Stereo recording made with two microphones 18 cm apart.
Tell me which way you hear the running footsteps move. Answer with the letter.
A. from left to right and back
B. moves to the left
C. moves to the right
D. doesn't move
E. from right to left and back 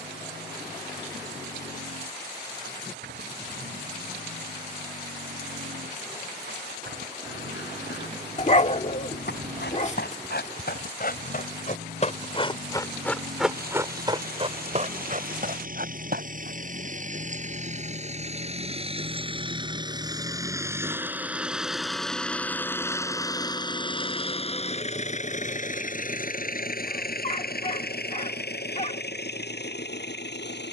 C.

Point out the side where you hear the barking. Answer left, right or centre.
left.